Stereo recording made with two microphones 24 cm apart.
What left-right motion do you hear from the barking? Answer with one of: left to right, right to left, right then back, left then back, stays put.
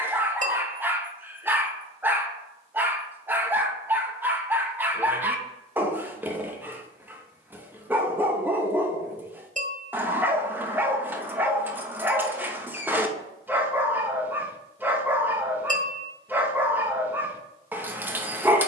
stays put.